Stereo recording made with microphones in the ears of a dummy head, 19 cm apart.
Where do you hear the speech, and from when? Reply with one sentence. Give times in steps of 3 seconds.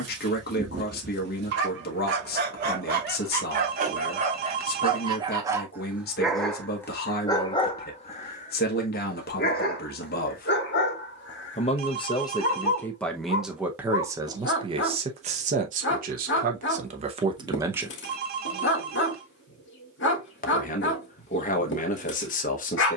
In this clip you hear the speech on the left from 0 s, in the centre from 12 s, on the right from 15 s and on the left from 18 s.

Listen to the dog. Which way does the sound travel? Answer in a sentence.
You can hear the dog travel towards the left.